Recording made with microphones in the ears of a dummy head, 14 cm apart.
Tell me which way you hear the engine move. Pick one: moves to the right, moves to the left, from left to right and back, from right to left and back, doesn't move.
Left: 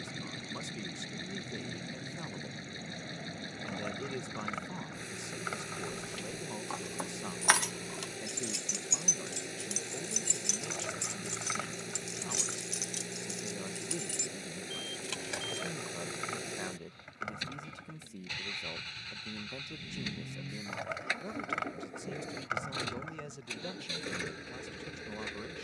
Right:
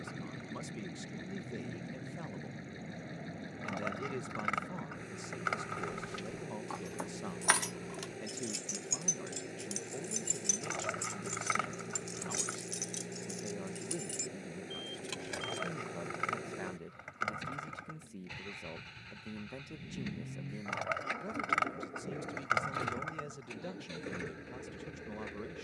doesn't move.